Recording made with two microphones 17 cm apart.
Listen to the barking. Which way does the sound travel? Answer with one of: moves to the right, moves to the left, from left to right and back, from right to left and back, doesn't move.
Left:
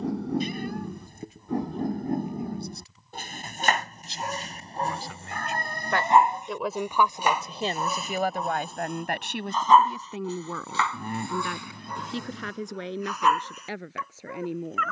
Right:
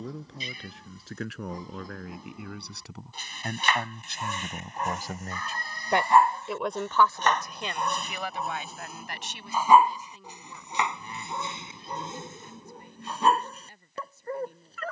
moves to the right.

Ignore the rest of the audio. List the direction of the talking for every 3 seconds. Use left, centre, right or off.
right, right, left, left, left.